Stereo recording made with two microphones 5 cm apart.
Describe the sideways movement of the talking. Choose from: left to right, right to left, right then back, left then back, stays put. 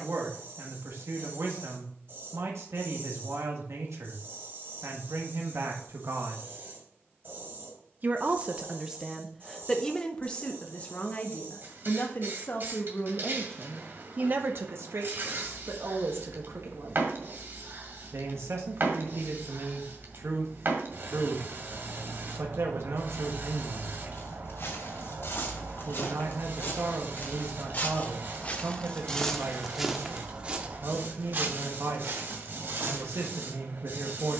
left then back.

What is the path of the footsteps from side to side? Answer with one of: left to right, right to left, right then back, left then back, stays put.
left to right.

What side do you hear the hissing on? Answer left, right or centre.
right.